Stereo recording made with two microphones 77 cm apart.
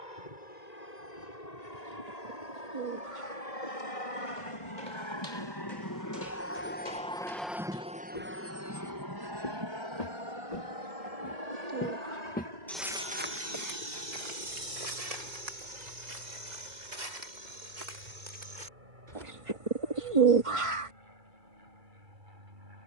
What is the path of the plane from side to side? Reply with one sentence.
In this clip you hear the plane move from left to right.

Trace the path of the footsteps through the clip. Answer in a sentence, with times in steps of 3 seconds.
You can hear the footsteps not at all from 0 s, on the left from 3 s, on the right from 12 s and not at all from 21 s.